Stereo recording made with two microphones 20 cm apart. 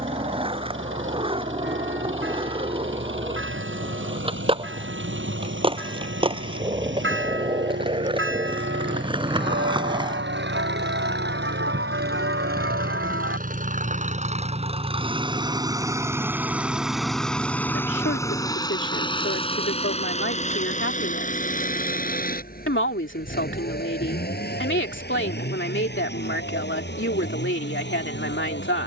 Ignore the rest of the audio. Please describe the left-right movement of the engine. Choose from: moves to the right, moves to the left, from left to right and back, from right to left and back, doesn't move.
moves to the left.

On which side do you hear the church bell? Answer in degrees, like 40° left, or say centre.
80° right.